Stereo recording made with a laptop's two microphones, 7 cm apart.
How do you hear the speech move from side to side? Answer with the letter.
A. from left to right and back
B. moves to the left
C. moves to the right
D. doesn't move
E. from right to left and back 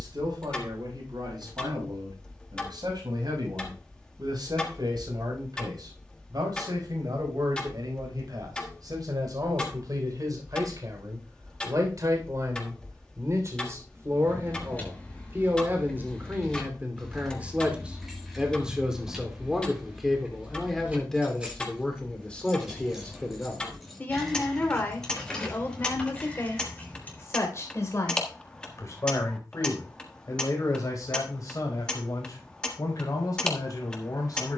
B.